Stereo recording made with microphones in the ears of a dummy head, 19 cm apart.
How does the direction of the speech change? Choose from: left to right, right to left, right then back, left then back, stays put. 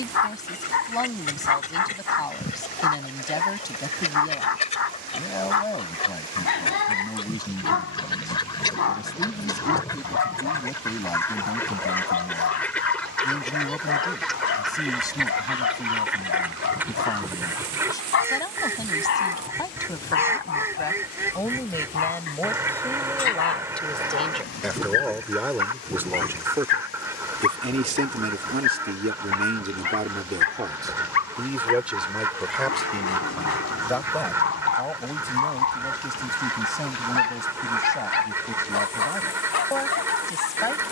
right then back.